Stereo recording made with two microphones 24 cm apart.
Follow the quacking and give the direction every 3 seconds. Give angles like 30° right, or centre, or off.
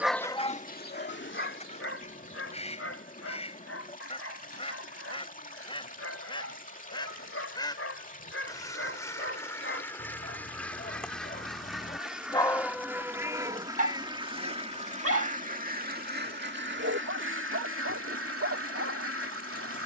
30° left, 20° left, 20° left, 10° left, 10° right, 50° right, 70° right.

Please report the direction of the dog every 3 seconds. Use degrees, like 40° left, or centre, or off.
50° left, 70° left, 60° left, 50° left, 20° right, 70° right, 70° right.